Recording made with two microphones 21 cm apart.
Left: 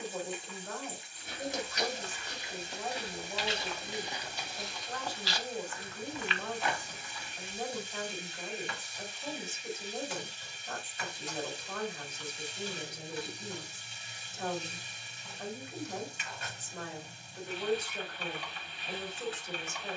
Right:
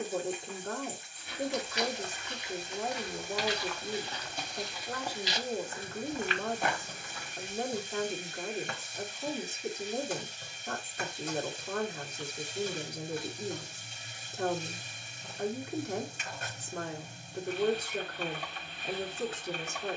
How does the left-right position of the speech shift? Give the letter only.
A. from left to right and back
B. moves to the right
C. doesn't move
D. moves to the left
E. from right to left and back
C.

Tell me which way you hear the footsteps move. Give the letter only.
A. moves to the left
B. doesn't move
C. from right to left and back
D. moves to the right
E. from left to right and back
D.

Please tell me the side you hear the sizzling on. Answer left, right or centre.
right.